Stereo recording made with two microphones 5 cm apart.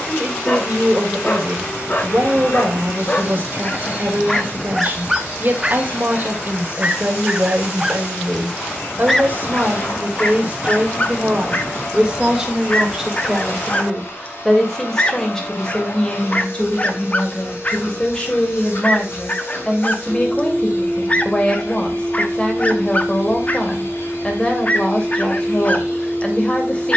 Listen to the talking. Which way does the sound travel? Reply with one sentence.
In this clip you hear the talking go from the right side to the left.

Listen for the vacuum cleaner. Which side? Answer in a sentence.
In this clip you hear the vacuum cleaner on the left.